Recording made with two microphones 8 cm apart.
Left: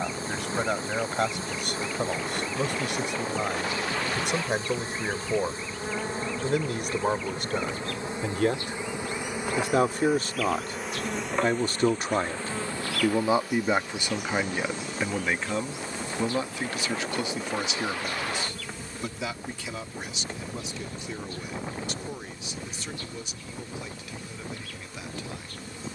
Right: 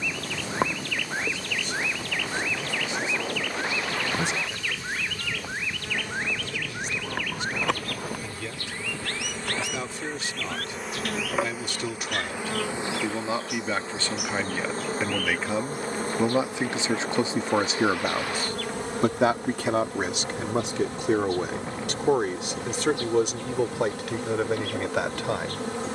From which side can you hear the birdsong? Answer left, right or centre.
right.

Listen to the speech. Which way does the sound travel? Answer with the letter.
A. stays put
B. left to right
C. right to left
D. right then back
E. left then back
B.